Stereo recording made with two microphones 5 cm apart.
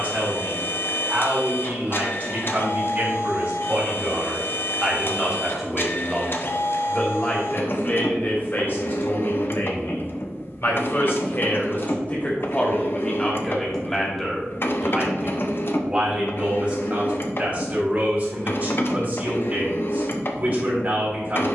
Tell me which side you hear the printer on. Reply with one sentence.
In this clip you hear the printer on the left.